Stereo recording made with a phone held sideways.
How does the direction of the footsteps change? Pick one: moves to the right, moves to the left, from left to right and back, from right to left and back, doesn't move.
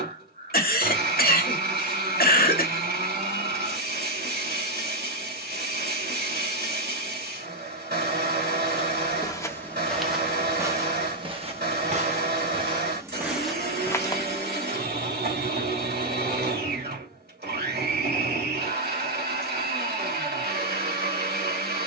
from left to right and back.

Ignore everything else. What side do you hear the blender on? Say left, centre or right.
right.